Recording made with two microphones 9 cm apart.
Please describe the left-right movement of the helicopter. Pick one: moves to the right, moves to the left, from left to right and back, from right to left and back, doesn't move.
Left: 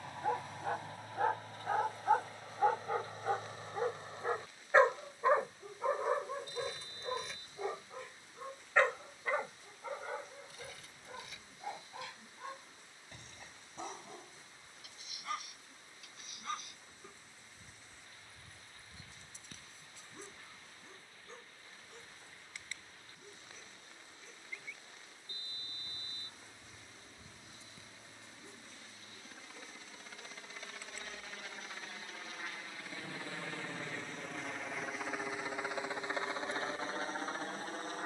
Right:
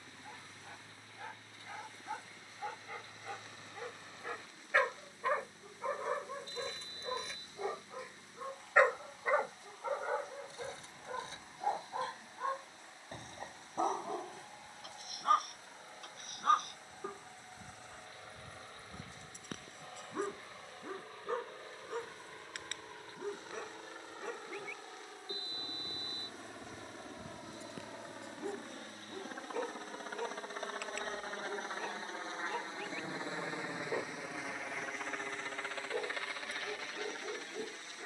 moves to the left.